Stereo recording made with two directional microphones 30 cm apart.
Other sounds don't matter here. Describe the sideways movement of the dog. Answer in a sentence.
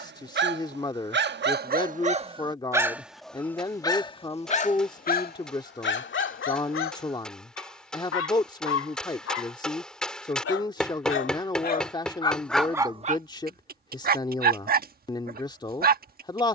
You can hear the dog go left and come back.